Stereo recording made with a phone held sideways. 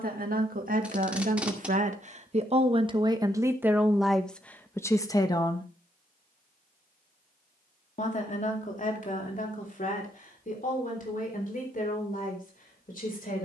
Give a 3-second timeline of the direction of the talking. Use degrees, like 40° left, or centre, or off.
60° right, centre, 50° left, 60° left, 60° left.